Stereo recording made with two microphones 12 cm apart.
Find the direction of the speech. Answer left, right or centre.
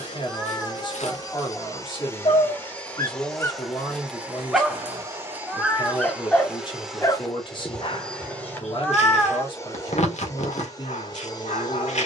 left.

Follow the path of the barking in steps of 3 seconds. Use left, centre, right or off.
left, centre, left, left.